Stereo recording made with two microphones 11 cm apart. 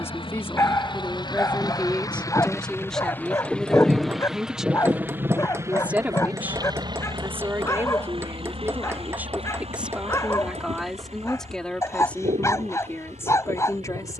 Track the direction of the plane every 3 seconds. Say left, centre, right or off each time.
left, centre, right, right, right.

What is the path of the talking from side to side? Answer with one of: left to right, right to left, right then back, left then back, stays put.
right then back.